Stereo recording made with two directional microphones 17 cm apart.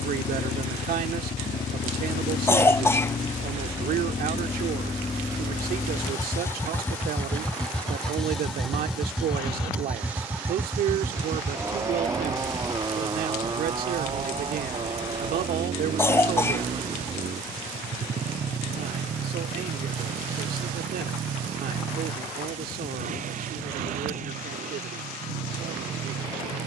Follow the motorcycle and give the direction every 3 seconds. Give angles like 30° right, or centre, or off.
40° left, 30° left, 10° left, 10° right, 20° right, 30° right, 40° right, 50° right, 50° right.